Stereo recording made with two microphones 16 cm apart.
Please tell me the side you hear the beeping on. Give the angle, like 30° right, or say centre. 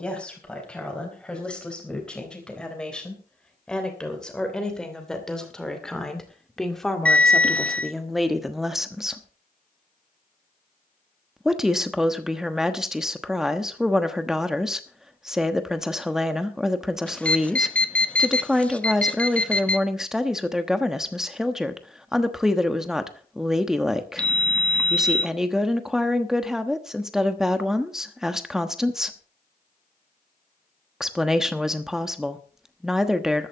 10° left.